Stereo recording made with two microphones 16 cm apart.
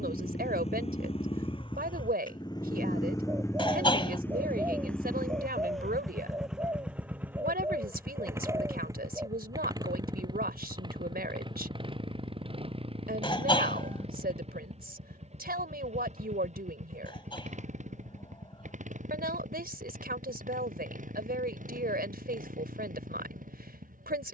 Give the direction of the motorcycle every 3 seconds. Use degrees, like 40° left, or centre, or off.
30° left, 10° left, 10° right, 20° right, 30° right, 40° right, 50° right, 50° right.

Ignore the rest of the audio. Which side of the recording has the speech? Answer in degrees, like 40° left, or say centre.
60° right.